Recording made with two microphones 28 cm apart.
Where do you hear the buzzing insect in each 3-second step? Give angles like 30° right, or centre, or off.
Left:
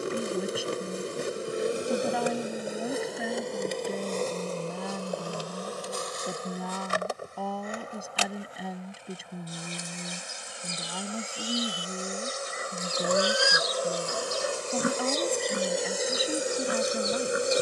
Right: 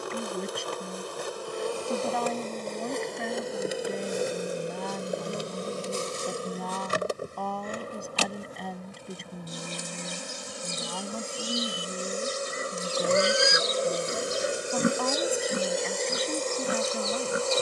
20° left, 10° right, 40° right, 50° right, 30° right, 10° left.